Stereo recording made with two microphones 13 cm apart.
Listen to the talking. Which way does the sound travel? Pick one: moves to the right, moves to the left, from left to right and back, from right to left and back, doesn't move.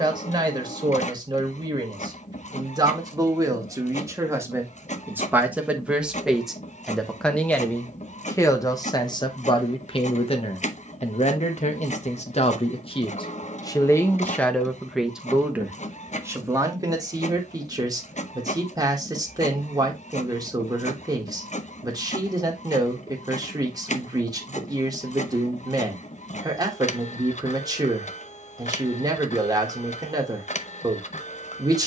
from right to left and back.